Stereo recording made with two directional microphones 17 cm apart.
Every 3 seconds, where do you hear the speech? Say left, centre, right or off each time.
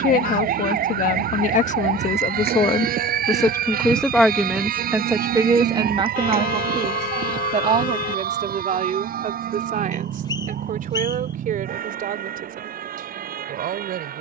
left, centre, right, right, right.